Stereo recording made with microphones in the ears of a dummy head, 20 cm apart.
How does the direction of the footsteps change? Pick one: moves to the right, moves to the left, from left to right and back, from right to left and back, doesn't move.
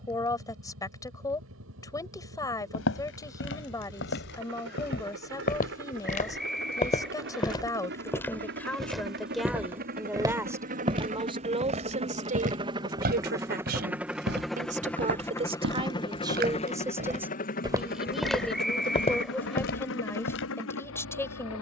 from left to right and back.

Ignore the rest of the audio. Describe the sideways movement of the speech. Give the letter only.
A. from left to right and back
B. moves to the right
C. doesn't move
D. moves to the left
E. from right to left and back
A.